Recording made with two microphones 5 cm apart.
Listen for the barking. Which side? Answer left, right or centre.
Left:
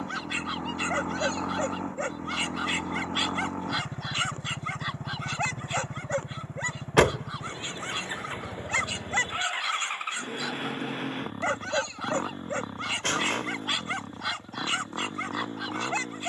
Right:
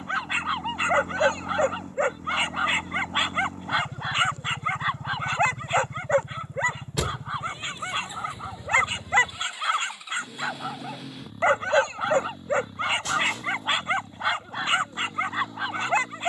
right.